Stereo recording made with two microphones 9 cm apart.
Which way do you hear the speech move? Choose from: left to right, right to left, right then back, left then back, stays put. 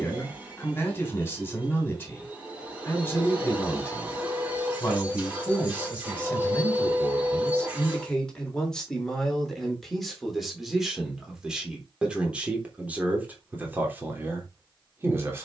left to right.